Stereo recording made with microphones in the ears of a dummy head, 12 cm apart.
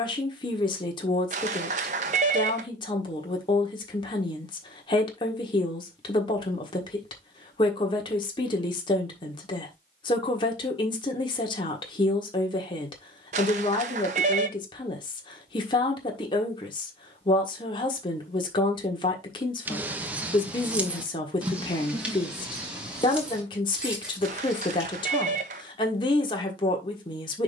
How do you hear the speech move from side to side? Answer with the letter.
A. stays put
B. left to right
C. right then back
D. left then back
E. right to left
A.